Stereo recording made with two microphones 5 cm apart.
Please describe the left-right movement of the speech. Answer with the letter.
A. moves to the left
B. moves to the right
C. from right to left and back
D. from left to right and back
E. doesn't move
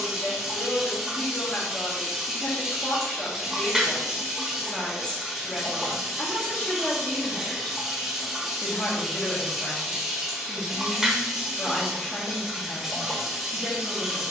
E.